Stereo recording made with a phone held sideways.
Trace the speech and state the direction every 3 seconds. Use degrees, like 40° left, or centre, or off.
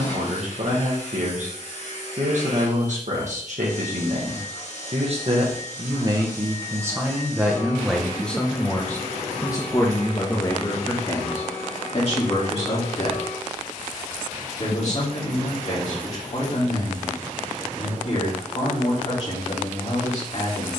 60° right, 50° right, 10° right, 30° left, 50° left, 50° left, 50° left.